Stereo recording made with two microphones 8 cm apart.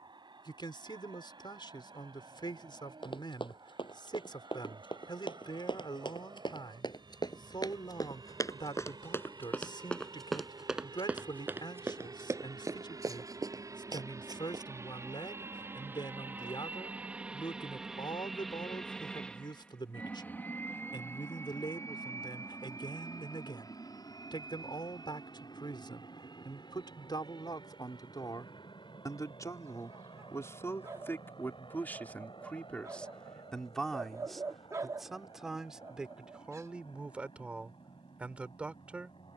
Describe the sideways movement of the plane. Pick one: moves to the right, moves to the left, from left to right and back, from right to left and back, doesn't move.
moves to the left.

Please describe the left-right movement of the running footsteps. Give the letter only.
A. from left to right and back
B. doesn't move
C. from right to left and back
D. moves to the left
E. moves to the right
E.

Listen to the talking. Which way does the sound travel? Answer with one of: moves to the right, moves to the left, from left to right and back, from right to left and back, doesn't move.
moves to the right.